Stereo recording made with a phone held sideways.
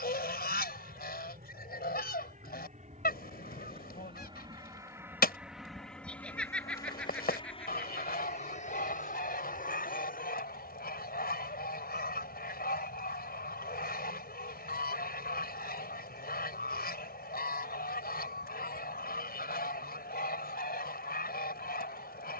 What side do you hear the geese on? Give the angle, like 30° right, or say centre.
70° left.